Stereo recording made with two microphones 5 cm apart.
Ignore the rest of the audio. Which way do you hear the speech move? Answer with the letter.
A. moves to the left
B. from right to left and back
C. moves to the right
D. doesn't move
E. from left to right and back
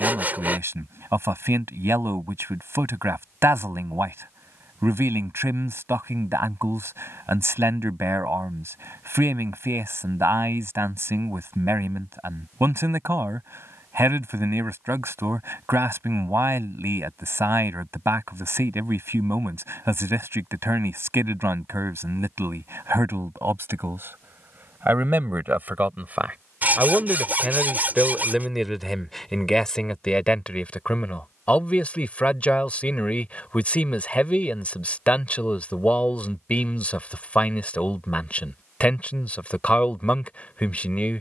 A.